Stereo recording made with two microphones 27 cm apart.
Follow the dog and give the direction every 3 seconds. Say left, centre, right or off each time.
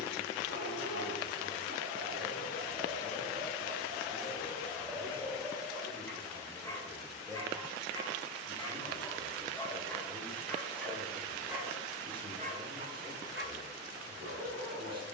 right, centre, centre, centre, right.